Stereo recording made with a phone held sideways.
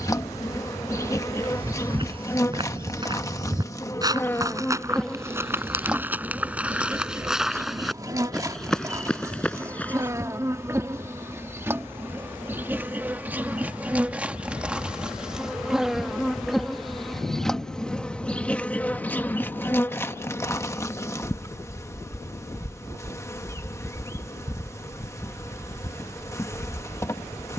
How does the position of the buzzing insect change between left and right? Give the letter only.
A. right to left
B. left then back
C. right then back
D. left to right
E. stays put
C.